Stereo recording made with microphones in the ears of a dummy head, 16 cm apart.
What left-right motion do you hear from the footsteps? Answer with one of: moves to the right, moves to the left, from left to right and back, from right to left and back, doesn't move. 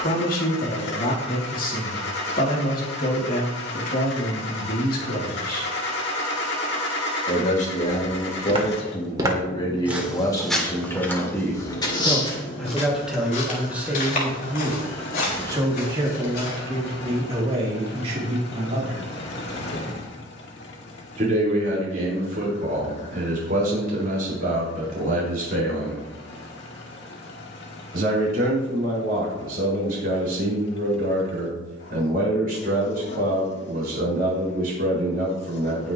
moves to the left.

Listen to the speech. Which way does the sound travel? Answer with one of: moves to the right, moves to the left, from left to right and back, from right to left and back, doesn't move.
moves to the right.